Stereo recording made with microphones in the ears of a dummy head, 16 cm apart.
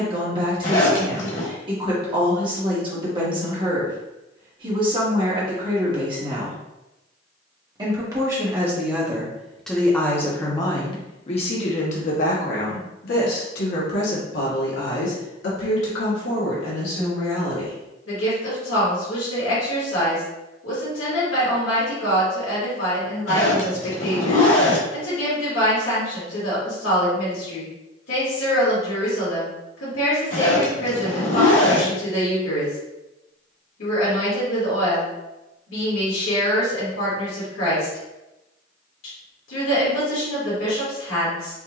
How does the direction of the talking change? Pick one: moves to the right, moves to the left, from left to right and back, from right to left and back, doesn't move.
moves to the left.